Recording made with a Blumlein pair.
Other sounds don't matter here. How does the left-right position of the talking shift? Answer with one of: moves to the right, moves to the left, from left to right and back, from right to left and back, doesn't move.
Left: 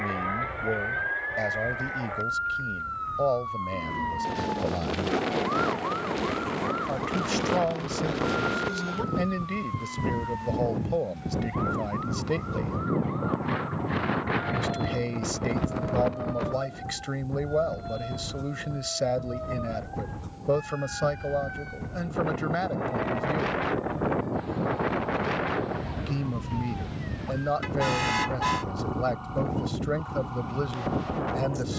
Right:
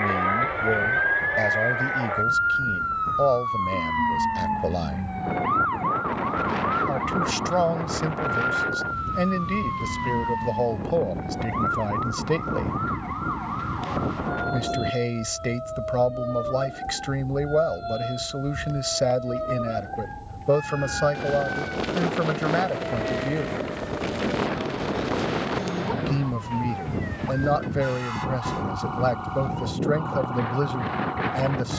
doesn't move.